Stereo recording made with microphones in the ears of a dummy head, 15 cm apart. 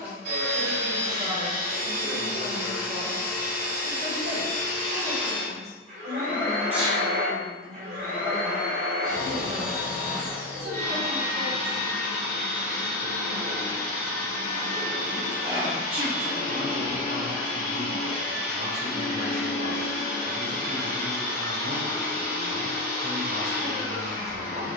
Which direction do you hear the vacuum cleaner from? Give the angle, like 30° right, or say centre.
70° right.